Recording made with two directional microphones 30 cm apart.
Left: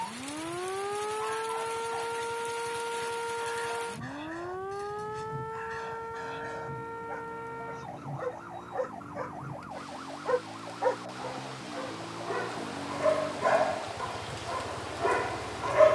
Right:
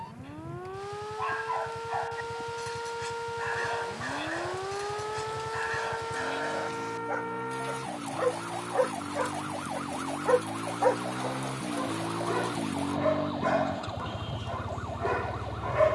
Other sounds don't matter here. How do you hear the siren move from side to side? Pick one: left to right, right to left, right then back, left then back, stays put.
left to right.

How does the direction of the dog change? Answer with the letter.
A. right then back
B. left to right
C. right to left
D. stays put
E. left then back
C.